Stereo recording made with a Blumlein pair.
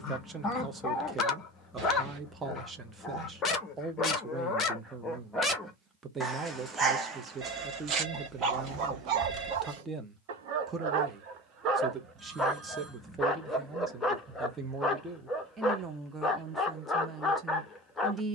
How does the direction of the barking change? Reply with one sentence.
You can hear the barking go right and come back.